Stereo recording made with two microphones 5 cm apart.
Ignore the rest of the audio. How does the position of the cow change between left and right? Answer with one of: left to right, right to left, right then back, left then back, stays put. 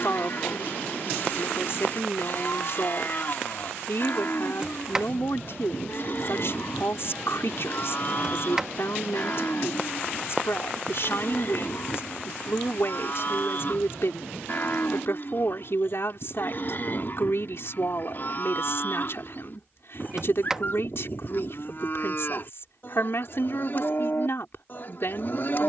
stays put.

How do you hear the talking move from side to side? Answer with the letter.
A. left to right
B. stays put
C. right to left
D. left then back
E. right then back
B.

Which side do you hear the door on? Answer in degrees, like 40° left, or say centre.
10° right.